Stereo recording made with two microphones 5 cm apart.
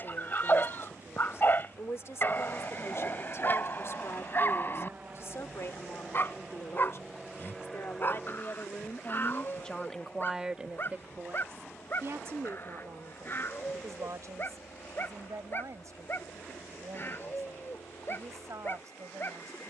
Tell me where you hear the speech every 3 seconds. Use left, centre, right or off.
left, left, left, centre, right, right, right.